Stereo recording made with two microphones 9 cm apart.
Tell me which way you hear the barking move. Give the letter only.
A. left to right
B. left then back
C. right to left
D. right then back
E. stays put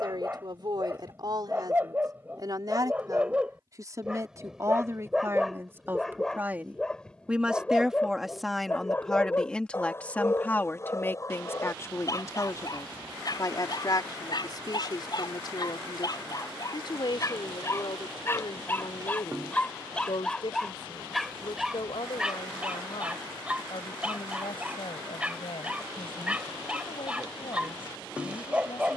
B.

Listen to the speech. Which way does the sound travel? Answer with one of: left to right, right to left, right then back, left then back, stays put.
right to left.